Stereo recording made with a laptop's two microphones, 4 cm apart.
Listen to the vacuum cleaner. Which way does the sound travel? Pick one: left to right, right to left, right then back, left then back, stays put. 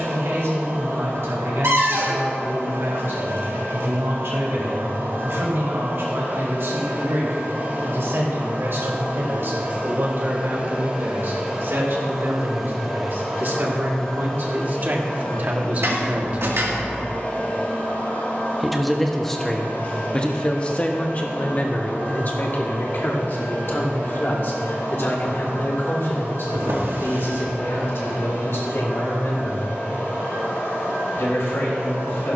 right to left.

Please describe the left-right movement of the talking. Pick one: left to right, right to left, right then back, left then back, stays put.
right to left.